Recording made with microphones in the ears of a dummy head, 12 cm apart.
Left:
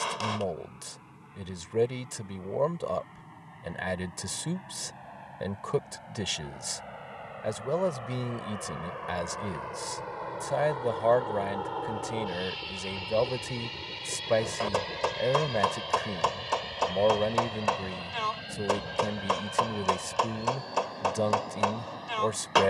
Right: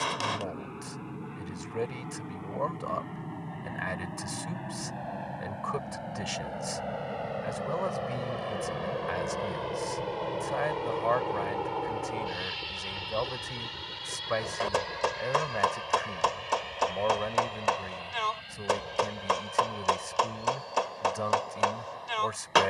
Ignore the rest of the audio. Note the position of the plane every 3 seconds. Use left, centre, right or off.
right, right, right, right, centre, left, left, left.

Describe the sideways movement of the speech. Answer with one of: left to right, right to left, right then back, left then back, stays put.
stays put.